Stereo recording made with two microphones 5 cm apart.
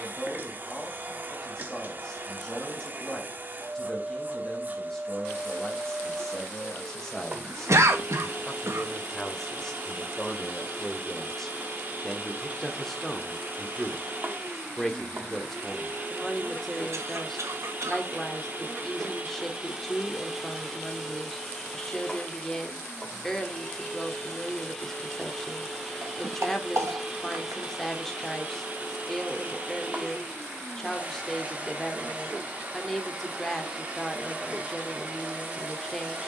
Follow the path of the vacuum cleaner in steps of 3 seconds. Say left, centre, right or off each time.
right, right, right, right, right, right, right, centre, centre, right, right, right.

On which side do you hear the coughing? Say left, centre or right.
right.